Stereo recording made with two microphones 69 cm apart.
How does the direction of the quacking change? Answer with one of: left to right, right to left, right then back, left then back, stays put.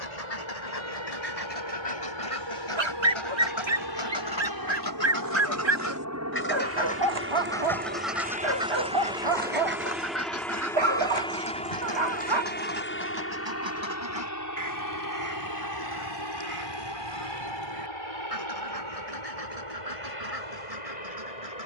left to right.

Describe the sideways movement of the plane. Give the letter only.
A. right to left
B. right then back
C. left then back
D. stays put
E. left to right
A.